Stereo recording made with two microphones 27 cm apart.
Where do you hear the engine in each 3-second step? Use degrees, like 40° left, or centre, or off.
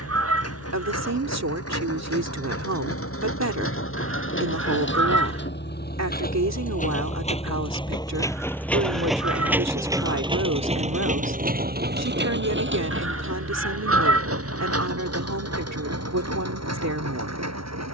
60° left, 50° left, 20° left, 20° right, 50° right, 60° right.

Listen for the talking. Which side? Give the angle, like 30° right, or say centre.
70° right.